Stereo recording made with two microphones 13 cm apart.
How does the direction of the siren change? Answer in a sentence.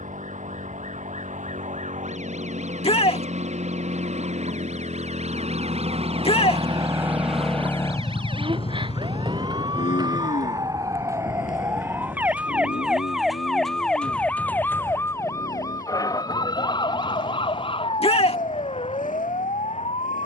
In this clip you hear the siren travel towards the left.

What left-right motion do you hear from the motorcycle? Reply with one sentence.
You can hear the motorcycle move from right to left.